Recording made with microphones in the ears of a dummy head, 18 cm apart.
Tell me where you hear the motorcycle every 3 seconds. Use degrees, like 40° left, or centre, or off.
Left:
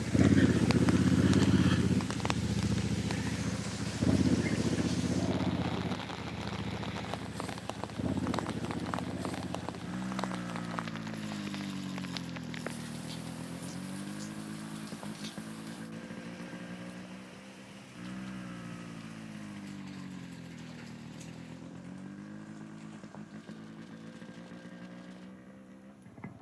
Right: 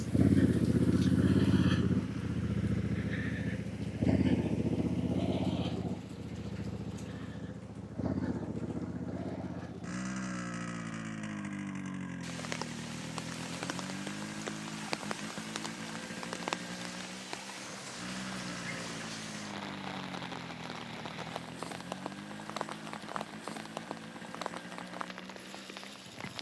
10° left, 50° right, 70° right, 70° right, 80° right, 80° right, 80° right, 80° right, 80° right.